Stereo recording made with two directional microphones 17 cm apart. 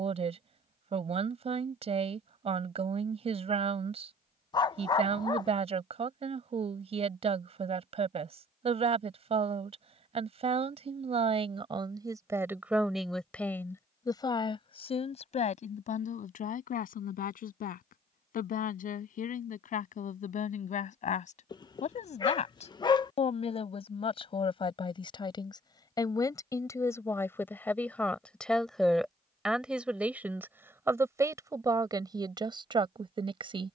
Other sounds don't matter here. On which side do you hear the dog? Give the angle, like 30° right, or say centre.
30° left.